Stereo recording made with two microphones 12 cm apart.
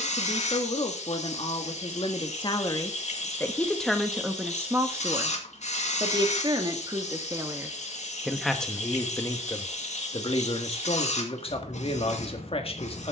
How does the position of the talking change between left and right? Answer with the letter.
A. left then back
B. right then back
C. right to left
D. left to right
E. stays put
B.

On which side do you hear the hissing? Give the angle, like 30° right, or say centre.
80° left.